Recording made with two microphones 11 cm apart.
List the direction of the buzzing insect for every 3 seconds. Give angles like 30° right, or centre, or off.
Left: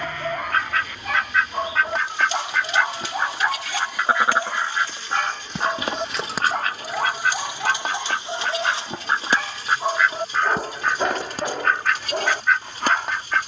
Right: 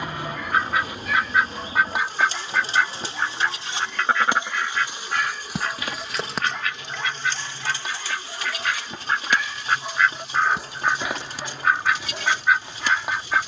40° right, 20° right, 10° left, 40° left, 50° left.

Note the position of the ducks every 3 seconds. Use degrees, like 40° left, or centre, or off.
10° right, 20° left, 40° left, centre, 10° right.